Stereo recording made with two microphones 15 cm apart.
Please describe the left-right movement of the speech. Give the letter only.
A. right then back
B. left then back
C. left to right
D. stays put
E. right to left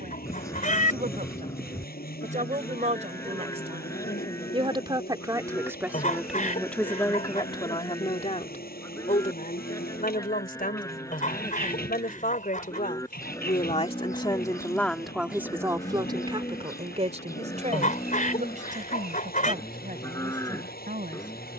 B.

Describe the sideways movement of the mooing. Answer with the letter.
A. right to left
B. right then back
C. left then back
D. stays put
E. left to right
D.